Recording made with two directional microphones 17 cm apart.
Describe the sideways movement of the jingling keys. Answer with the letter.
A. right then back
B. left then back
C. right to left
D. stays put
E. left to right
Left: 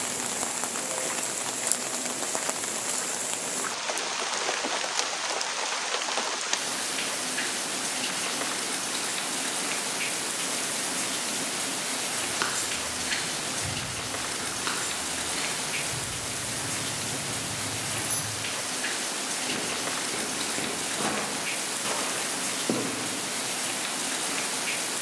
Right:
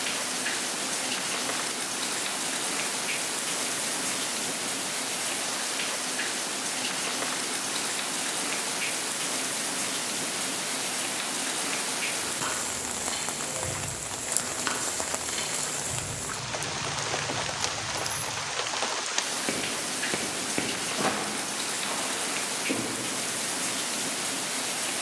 A.